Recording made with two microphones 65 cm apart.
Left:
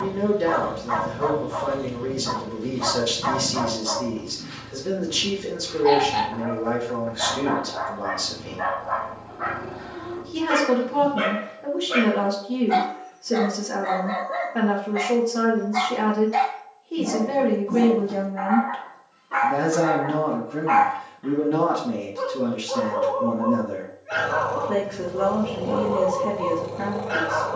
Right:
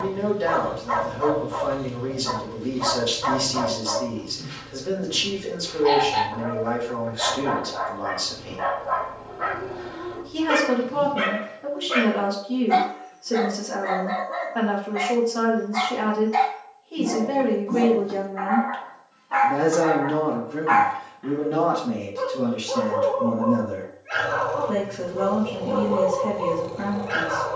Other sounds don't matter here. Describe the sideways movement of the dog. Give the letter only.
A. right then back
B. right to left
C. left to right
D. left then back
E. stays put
D.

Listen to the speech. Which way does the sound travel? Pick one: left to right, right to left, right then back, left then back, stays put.
left to right.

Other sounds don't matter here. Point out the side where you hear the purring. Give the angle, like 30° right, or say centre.
70° left.